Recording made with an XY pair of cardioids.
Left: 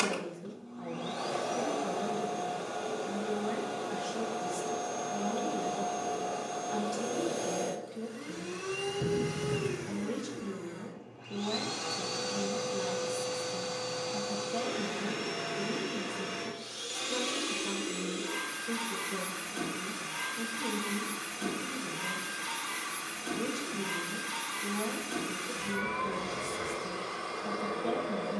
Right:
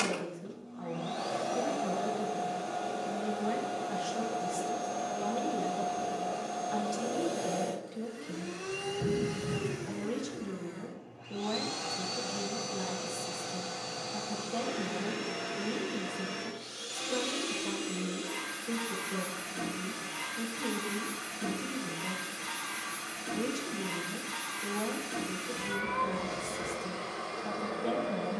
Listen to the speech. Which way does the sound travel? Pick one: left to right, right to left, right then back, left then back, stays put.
stays put.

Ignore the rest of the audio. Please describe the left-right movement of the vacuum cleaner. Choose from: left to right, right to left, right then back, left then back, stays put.
stays put.